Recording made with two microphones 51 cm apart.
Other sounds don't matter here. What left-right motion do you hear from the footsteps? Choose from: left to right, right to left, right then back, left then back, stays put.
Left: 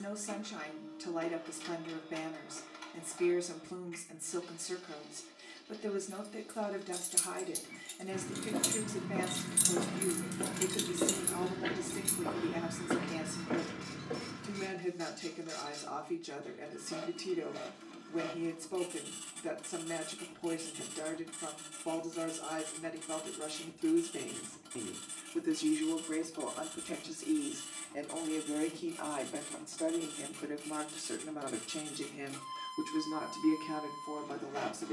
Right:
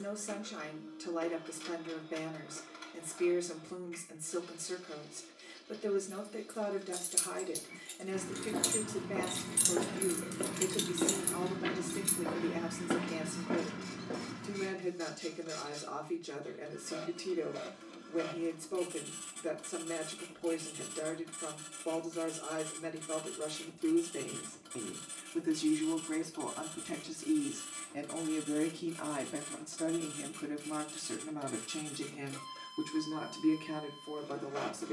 left to right.